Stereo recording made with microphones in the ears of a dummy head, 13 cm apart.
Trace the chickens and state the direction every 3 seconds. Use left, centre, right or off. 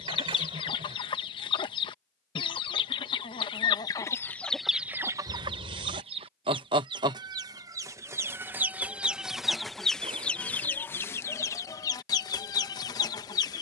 left, centre, right, centre, left.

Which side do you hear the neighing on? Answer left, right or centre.
right.